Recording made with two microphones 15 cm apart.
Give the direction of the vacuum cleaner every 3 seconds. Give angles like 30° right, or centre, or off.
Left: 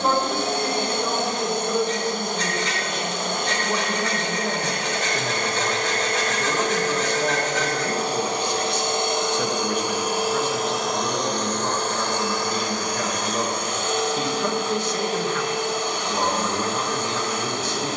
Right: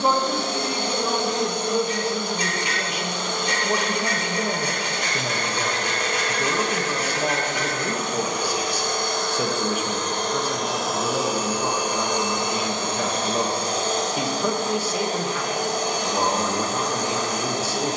50° left, 50° left, 40° left, centre, 30° right, 40° right.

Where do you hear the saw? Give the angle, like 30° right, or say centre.
10° right.